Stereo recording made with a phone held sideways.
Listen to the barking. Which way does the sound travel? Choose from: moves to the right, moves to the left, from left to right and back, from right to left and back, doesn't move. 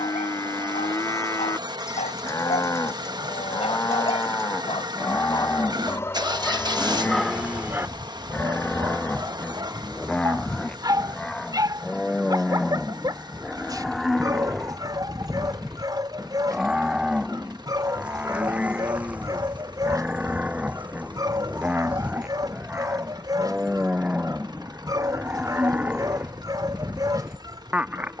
moves to the right.